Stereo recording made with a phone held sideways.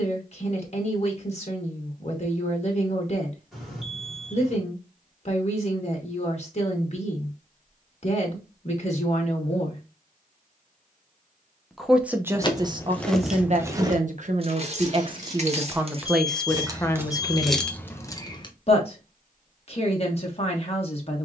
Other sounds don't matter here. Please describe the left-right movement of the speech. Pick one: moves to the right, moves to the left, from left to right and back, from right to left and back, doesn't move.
from left to right and back.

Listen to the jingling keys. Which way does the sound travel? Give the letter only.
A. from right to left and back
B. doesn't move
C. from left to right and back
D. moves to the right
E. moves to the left
C.